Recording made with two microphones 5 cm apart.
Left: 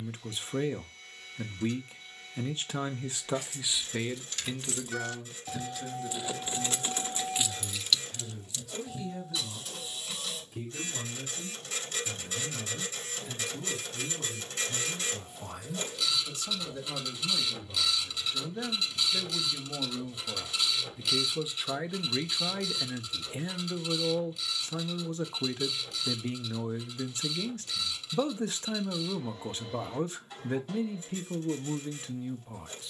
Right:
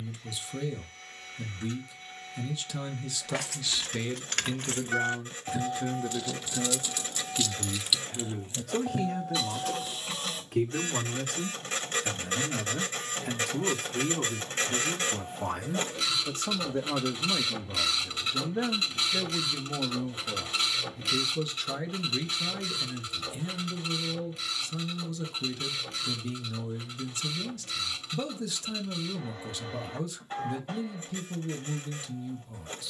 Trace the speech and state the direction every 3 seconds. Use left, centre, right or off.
left, centre, right, right, right, right, centre, left, left, left, left.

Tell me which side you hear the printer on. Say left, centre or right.
right.